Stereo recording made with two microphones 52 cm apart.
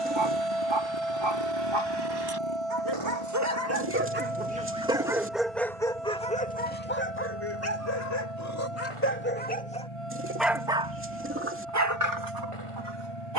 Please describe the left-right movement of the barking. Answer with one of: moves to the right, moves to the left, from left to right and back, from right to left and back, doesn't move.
from right to left and back.